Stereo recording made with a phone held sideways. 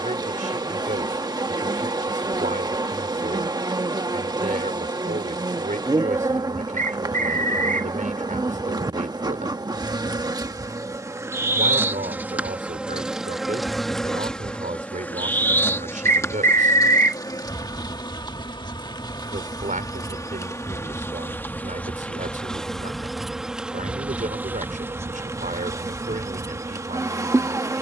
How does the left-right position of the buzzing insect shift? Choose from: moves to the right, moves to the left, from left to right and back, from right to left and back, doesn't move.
from right to left and back.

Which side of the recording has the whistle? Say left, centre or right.
right.